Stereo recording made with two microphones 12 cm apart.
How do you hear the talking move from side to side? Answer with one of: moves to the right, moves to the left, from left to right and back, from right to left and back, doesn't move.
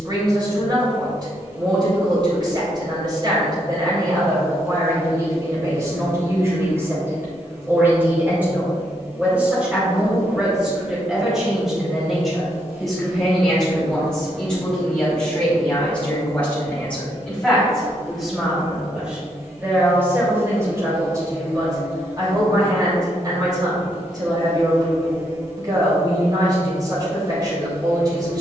from right to left and back.